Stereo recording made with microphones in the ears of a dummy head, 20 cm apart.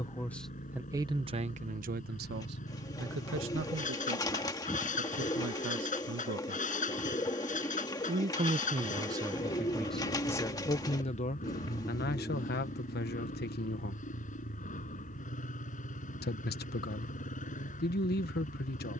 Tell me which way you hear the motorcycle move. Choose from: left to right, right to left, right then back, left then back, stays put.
stays put.